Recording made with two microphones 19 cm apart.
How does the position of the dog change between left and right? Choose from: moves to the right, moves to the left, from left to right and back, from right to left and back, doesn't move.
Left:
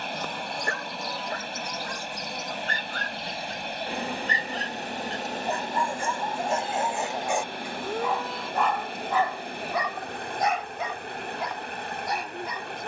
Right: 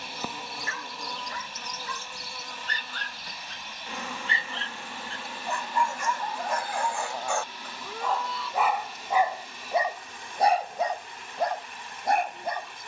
moves to the right.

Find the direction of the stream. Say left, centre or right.
left.